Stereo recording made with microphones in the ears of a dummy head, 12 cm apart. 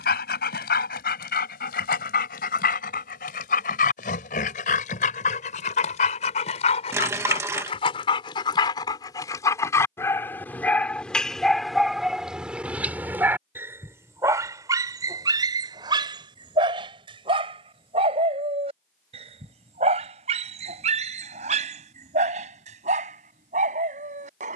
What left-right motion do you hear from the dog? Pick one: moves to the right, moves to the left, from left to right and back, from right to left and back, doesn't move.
moves to the right.